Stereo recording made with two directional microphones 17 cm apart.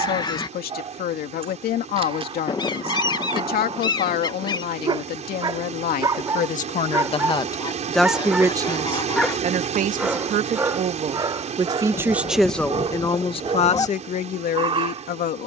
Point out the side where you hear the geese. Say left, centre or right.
left.